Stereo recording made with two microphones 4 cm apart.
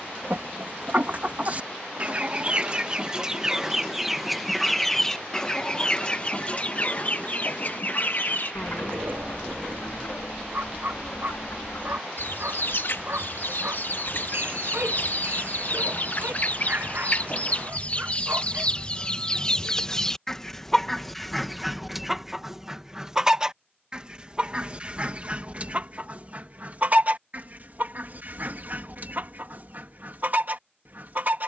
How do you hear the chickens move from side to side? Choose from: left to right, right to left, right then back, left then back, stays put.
left then back.